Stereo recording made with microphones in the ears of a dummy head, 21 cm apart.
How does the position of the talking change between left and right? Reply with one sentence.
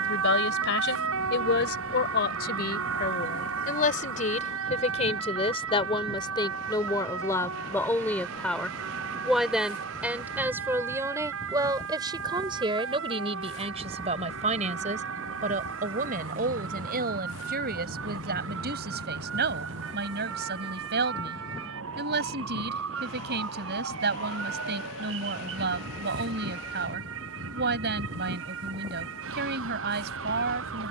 You can hear the talking travel towards the right.